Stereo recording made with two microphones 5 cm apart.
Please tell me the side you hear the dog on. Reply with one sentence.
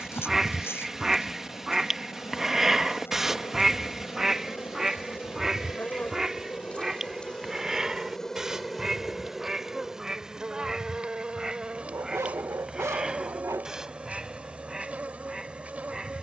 You can hear the dog on the right.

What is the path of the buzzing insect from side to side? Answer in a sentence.
In this clip you hear the buzzing insect move from left to right.